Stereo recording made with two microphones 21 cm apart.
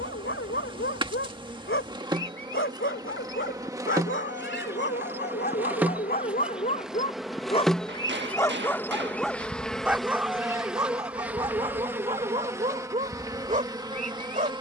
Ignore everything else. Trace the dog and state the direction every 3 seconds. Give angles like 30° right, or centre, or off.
70° left, 60° left, 30° left, 10° right, 30° right.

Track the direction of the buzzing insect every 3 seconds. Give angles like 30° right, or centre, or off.
20° right, 10° right, centre, centre, 20° right.